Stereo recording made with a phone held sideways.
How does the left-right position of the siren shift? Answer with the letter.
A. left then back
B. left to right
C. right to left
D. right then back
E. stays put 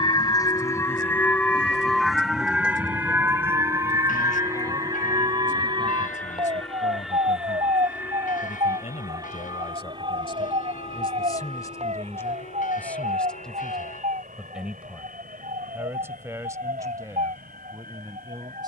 B.